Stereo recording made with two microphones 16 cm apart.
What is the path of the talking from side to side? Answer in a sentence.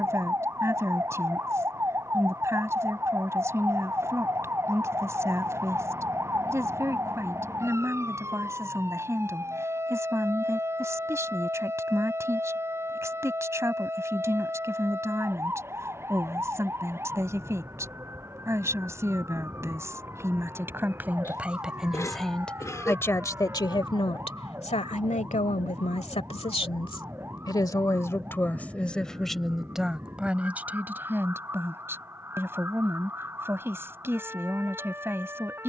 You can hear the talking move from right to left and back again.